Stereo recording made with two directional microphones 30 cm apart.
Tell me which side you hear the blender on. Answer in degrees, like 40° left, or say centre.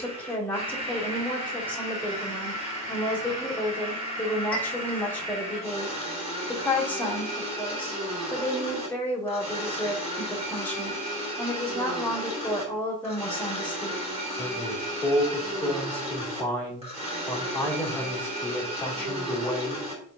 20° right.